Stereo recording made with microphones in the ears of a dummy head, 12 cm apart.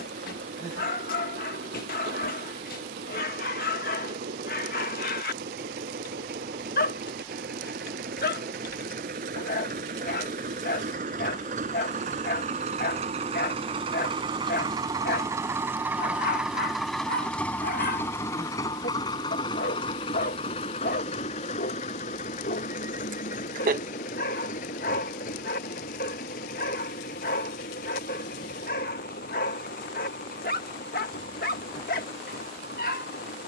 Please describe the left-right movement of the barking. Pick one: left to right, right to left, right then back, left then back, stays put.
stays put.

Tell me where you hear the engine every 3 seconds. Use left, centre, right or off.
right, right, right, right, right, centre, left, left, left, left, left.